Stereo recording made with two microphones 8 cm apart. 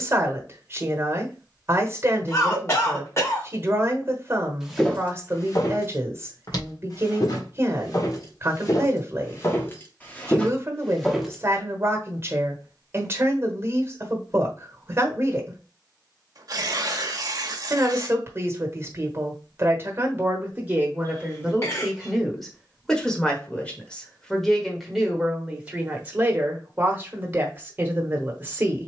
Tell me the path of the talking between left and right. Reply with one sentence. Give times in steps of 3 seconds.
You can hear the talking on the right from 0 s, in the centre from 21 s and on the right from 27 s.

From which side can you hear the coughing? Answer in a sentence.
You can hear the coughing on the left.